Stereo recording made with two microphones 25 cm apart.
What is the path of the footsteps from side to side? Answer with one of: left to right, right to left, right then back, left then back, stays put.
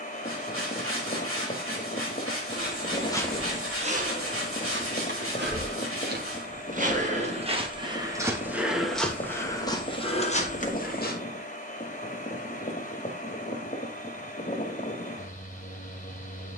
right then back.